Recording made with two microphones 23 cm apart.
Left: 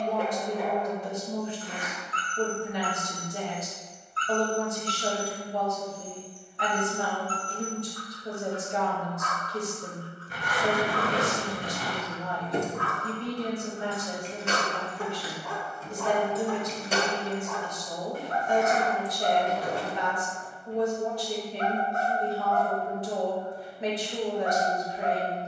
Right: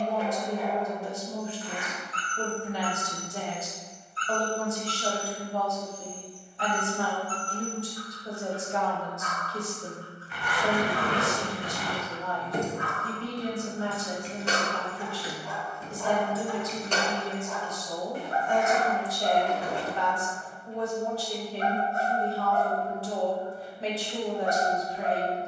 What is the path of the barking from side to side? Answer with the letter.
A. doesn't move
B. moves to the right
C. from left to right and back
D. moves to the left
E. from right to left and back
A.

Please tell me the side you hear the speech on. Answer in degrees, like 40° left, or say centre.
20° left.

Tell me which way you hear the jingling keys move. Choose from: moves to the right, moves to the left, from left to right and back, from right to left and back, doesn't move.
from left to right and back.